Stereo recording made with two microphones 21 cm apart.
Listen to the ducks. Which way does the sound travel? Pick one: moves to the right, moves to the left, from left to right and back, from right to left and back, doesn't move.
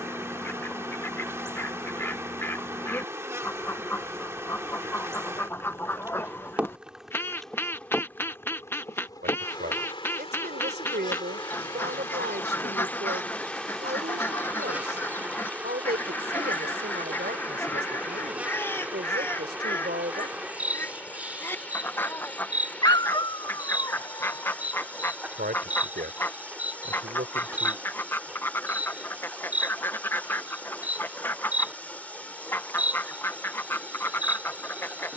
doesn't move.